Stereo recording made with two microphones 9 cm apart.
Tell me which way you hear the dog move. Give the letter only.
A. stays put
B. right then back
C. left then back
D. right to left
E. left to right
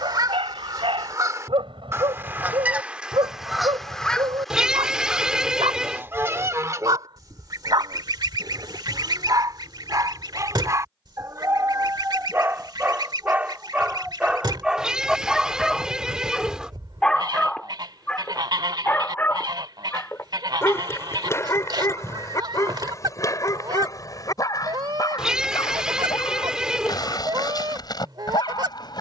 D.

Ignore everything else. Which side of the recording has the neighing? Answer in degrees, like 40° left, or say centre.
10° right.